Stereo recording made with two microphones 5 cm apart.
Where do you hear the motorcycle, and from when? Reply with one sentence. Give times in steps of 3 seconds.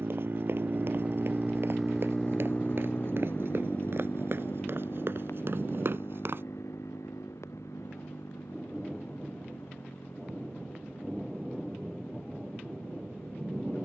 You can hear the motorcycle in the centre from 0 s and on the left from 3 s.